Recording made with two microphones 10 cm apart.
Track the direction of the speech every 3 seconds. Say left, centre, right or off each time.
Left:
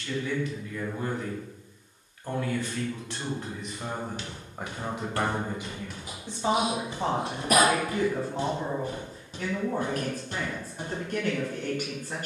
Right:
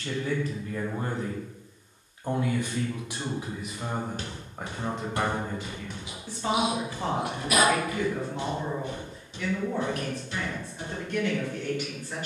right, centre, left, left.